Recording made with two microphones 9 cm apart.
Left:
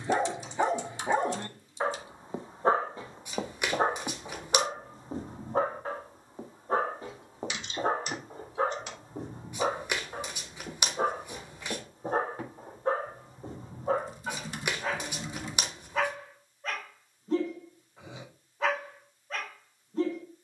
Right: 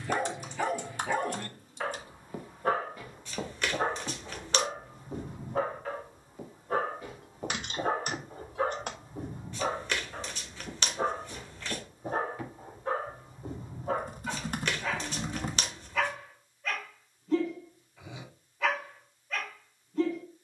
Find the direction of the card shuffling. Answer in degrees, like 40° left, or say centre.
20° left.